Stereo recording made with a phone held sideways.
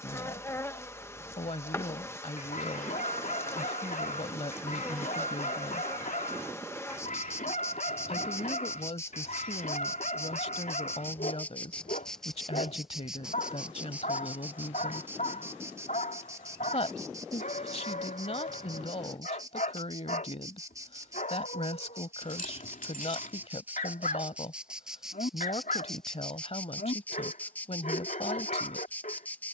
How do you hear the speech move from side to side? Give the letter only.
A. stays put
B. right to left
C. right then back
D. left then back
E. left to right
A.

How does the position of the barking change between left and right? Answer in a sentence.
In this clip you hear the barking stay put.